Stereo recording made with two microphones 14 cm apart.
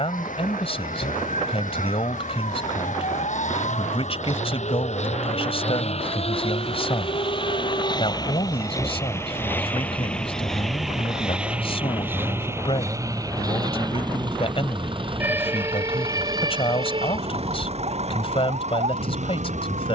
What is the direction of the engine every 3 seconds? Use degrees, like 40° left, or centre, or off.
70° left, 60° left, 40° left, centre, 30° right, 40° right, 50° right.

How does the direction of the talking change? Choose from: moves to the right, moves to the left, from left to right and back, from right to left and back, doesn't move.
doesn't move.